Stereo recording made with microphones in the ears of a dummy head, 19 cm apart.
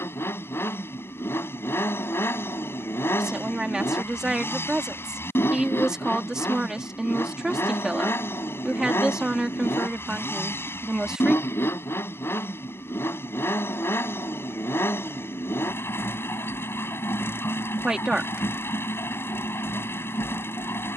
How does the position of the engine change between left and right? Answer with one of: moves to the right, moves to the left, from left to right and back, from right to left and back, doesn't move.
doesn't move.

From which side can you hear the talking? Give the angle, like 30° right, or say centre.
centre.